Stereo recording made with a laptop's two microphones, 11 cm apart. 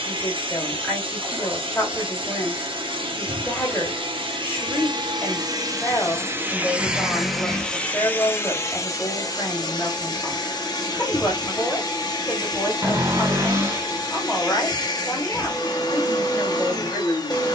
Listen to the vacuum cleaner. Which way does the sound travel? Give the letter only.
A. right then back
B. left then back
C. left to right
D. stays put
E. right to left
E.